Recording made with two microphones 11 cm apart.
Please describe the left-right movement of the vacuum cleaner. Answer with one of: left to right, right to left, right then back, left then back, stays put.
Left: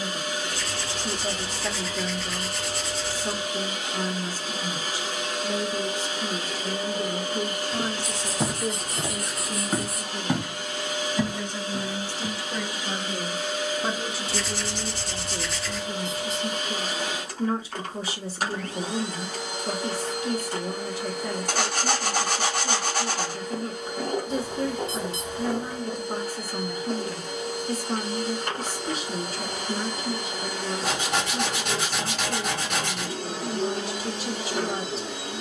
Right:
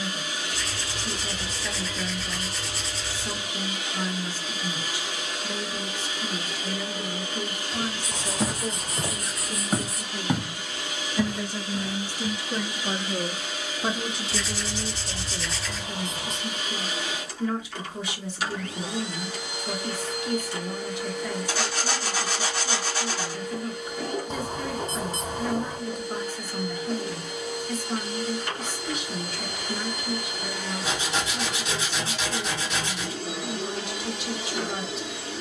stays put.